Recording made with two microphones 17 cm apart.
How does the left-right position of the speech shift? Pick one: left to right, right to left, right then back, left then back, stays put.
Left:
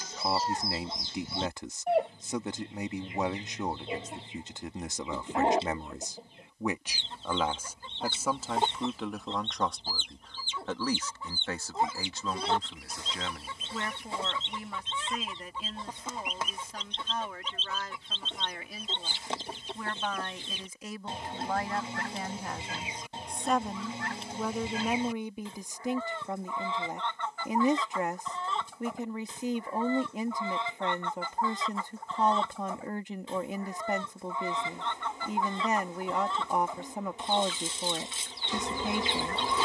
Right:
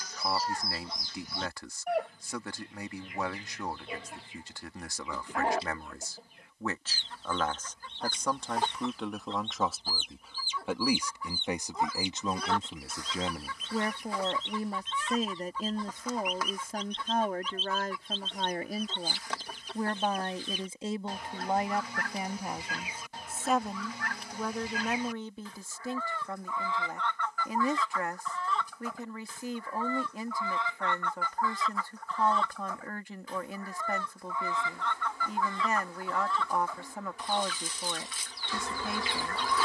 right then back.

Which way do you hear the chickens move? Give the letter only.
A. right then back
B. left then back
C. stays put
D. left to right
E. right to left
C.